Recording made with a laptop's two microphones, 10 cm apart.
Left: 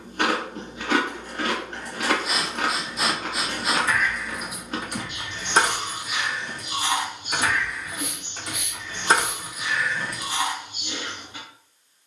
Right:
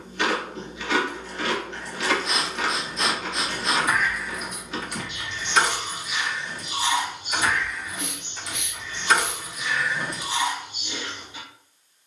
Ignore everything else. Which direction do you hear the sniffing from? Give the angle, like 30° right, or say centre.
10° left.